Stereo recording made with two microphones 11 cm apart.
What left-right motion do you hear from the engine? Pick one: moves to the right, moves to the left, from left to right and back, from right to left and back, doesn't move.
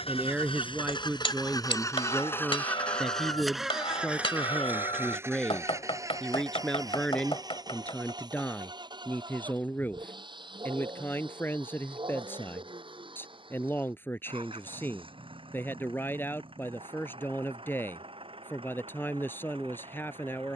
moves to the right.